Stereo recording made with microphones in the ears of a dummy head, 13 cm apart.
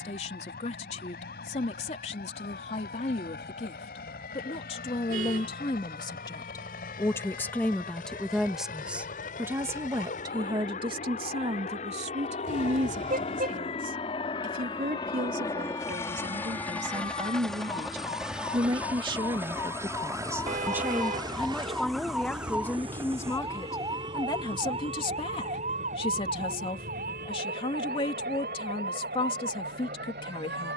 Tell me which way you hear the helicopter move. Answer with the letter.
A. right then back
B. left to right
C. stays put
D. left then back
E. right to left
B.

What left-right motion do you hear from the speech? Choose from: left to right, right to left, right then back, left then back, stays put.
right then back.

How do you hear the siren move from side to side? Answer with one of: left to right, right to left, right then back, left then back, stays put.
left to right.